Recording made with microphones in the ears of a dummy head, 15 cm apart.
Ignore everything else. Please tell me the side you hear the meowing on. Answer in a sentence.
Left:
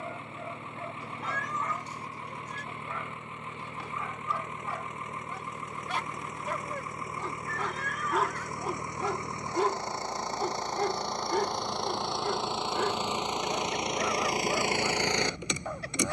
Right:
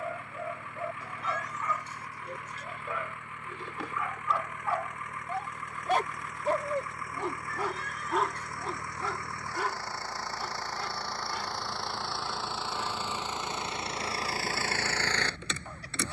You can hear the meowing on the left.